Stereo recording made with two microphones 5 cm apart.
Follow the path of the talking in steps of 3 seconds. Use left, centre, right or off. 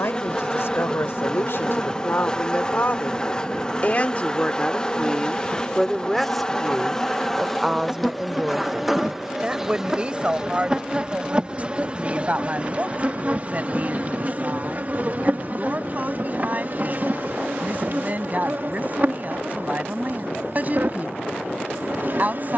left, left, centre, right, right, right, right, right.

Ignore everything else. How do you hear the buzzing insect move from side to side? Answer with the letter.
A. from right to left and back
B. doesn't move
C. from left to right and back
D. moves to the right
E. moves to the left
D.